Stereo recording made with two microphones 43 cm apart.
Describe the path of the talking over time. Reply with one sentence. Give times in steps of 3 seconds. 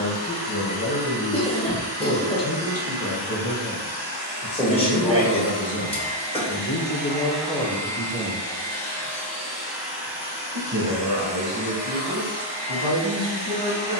In this clip you hear the talking on the left from 0 s, in the centre from 6 s and on the right from 9 s.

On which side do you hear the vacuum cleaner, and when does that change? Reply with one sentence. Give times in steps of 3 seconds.
In this clip you hear the vacuum cleaner on the right from 0 s, in the centre from 6 s and on the right from 12 s.